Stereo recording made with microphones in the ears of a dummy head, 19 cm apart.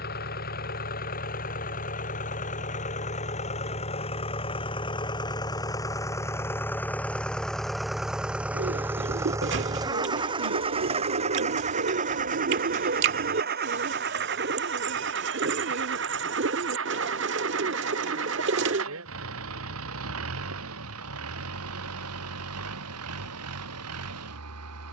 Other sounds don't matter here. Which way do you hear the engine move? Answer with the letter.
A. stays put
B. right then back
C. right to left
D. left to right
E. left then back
D.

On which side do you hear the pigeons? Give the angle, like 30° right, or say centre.
60° right.